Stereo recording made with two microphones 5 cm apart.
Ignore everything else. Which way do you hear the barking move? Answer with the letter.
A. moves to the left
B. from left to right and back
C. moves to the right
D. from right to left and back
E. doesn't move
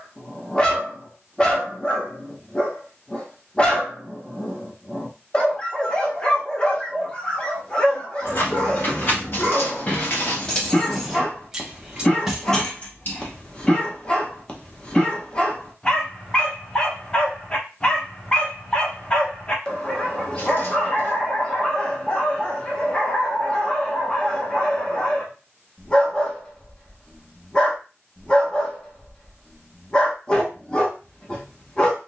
E.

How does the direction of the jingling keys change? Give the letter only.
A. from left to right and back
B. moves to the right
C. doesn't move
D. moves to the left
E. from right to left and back
A.